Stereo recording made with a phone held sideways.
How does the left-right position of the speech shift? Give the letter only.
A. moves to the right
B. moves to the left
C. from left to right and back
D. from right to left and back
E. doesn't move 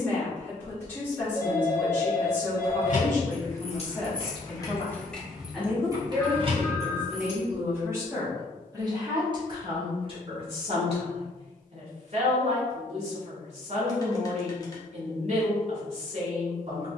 A.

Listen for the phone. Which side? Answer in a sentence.
In this clip you hear the phone on the left.